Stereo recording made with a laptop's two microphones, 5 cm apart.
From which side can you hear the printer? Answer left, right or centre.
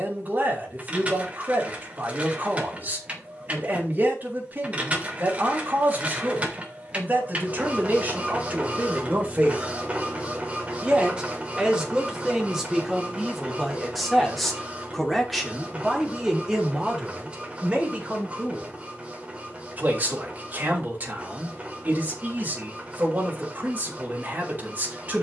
right.